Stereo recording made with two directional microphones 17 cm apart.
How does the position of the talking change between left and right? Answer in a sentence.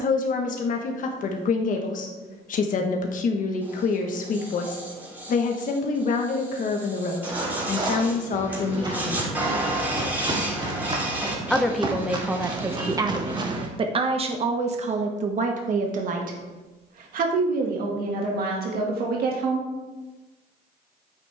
You can hear the talking travel towards the right.